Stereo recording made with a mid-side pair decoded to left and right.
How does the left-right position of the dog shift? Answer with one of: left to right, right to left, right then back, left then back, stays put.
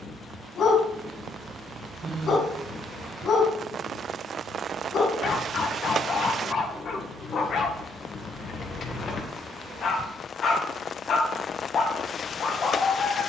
stays put.